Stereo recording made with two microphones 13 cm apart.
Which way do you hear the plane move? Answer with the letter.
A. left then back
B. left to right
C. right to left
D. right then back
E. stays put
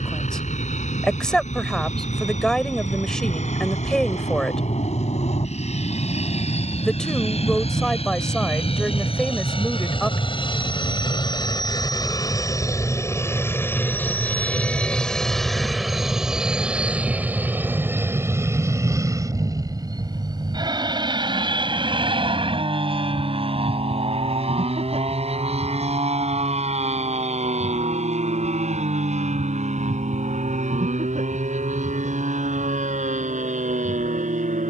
B.